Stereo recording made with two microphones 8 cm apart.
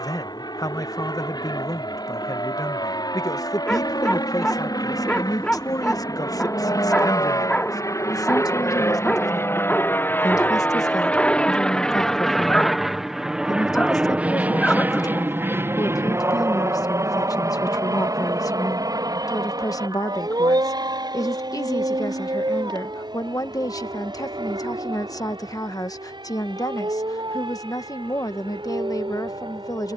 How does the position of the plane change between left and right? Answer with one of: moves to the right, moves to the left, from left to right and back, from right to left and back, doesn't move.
moves to the right.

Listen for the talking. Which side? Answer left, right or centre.
left.